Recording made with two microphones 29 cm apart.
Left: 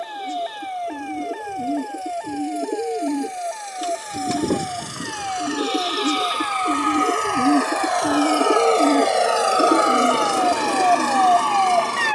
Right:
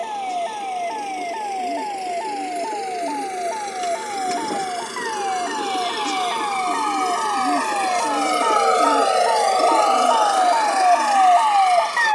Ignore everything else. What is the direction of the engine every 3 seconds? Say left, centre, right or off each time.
right, right, right, left.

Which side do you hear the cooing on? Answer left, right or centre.
left.